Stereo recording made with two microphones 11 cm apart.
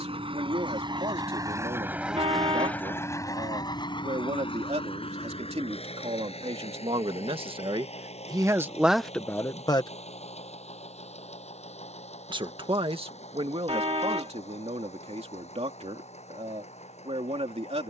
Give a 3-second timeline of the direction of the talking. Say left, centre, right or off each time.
right, right, right, left, right, right.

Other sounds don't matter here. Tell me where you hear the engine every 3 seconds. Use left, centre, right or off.
right, left, left, left, left, left.